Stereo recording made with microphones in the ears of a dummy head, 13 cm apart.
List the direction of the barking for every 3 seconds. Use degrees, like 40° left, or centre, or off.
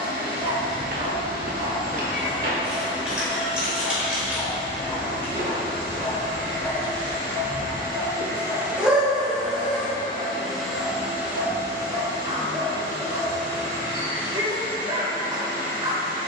30° right, centre, 10° right, 30° right, 30° right, 30° right.